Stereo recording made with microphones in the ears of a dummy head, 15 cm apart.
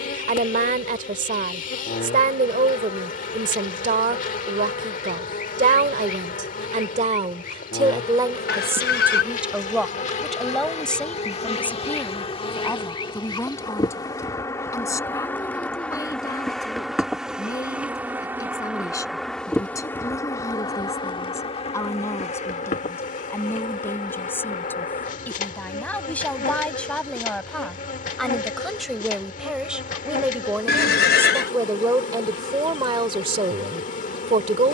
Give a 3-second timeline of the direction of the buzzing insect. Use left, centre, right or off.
left, left, left, left, left, centre, centre, left, left, left, left, left.